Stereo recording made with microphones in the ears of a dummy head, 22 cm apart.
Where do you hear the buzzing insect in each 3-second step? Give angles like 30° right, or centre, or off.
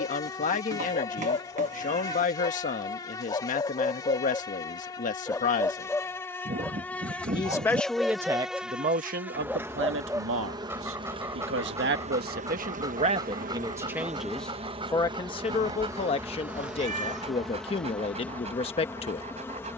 10° left, 10° left, centre, 20° right, 30° right, 10° right, 10° left.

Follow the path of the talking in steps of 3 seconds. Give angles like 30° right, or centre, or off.
30° left, 30° left, 10° right, 50° right, 20° right, 20° left, 20° left.